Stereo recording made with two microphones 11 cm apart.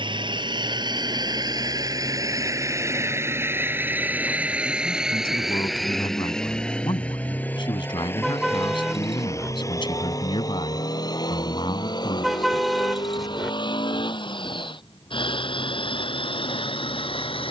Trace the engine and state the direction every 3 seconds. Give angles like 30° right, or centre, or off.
40° right, 10° right, 20° left, 30° left, 50° left, 50° left.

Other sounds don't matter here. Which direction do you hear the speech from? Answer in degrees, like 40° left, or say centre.
50° left.